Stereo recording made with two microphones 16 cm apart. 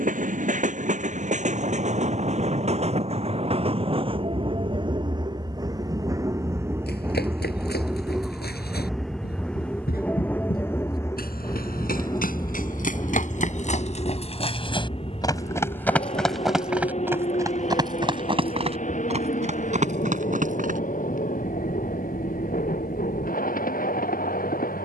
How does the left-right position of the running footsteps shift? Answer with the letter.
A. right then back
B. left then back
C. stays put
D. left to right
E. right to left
D.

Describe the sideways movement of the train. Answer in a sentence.
In this clip you hear the train move from right to left.